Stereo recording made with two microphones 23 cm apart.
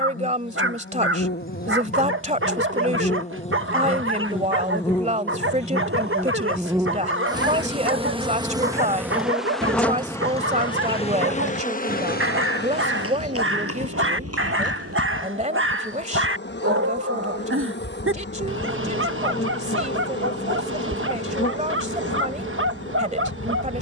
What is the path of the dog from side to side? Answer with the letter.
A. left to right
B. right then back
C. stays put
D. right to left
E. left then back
C.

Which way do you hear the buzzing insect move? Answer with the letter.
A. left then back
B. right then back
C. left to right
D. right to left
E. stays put
B.